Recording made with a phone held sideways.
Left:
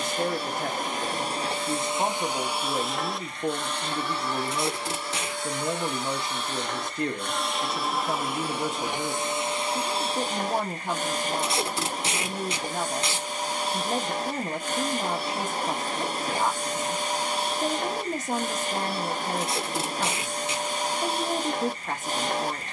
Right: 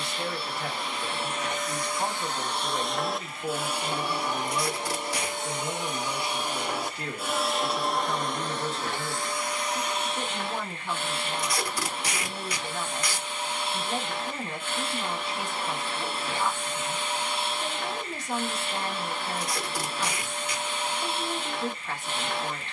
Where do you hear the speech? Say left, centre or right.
left.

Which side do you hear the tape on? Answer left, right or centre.
left.